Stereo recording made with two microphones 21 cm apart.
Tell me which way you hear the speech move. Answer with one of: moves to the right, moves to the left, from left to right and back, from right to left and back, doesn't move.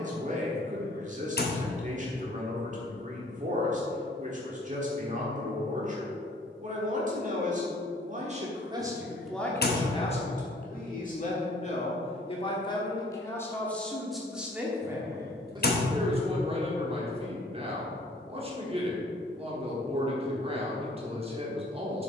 from right to left and back.